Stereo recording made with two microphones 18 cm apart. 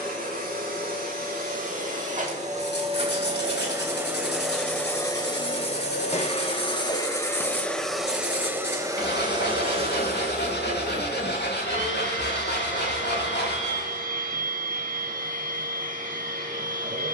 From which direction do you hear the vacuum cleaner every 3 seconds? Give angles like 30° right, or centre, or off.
50° right, centre, 10° left, 40° right, 50° right, 50° right.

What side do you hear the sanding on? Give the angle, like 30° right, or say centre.
70° left.